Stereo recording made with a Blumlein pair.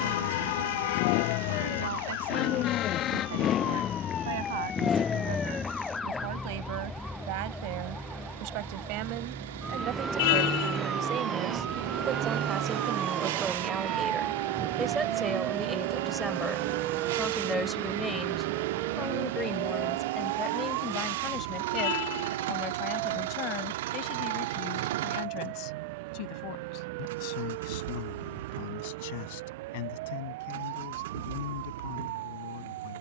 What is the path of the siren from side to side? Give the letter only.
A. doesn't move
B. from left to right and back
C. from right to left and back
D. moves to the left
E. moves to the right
E.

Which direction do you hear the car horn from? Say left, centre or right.
left.